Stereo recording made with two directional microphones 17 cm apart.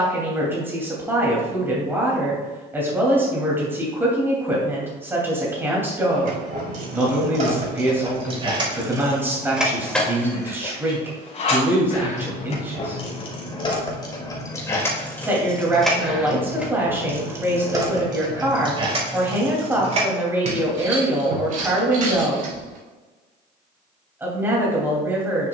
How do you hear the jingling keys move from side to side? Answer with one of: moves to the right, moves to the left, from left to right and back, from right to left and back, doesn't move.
from right to left and back.